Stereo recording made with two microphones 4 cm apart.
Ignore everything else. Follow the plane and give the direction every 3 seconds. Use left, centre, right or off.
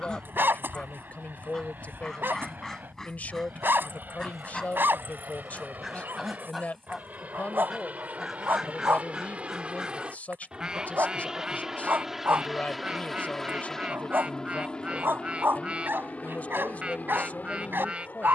right, right, right, right, centre, left.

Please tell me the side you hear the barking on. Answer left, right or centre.
right.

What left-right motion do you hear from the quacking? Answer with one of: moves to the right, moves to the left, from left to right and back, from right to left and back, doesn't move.
moves to the right.